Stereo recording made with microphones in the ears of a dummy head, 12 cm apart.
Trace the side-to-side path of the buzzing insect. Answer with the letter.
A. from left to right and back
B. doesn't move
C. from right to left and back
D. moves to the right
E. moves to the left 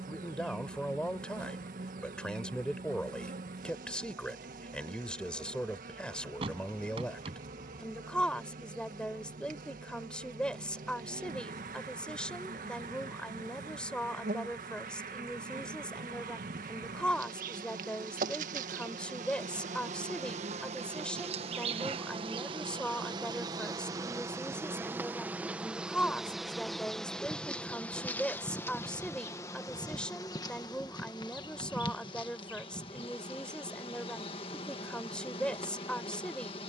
E.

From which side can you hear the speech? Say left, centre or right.
centre.